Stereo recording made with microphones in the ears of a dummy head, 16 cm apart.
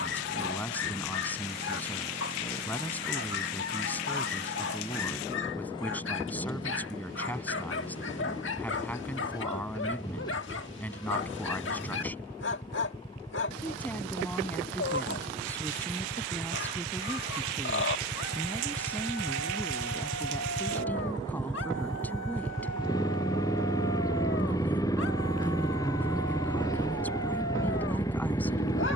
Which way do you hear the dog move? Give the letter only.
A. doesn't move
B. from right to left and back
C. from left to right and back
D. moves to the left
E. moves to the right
A.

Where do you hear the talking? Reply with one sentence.
In this clip you hear the talking in the centre.